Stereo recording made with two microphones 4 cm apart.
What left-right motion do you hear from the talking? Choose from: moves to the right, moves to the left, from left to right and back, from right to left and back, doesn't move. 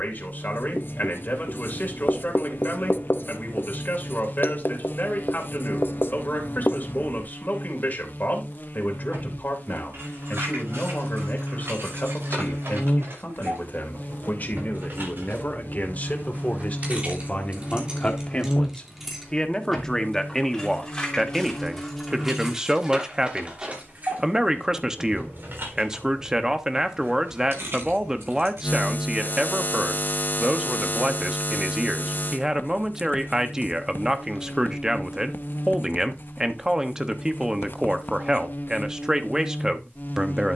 moves to the right.